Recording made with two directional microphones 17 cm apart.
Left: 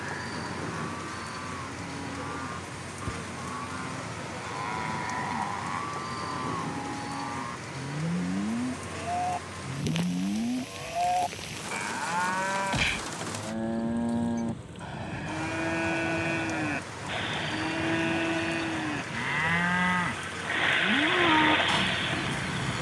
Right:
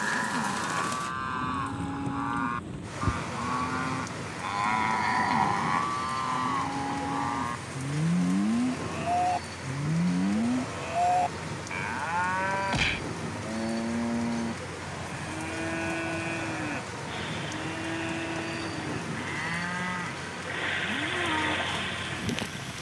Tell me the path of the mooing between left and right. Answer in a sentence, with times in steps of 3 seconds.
You can hear the mooing on the right from 0 s, in the centre from 9 s and on the left from 15 s.